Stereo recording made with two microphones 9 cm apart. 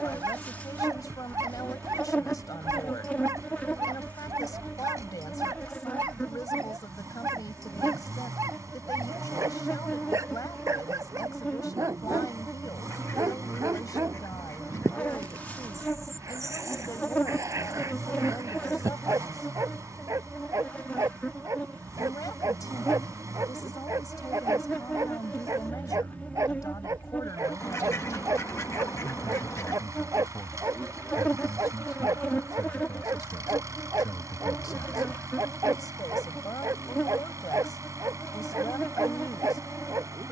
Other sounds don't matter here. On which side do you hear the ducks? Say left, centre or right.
left.